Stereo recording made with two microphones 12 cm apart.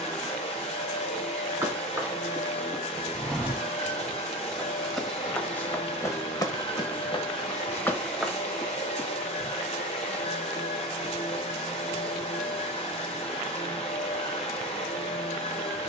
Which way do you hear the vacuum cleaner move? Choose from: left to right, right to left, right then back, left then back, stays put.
stays put.